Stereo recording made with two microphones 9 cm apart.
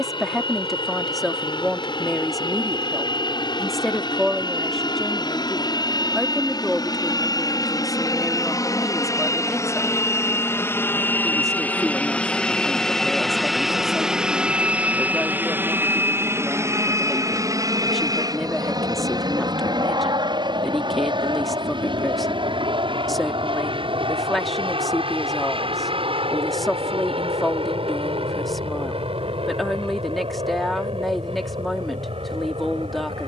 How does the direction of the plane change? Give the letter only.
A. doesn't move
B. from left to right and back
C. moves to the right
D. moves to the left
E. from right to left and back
C.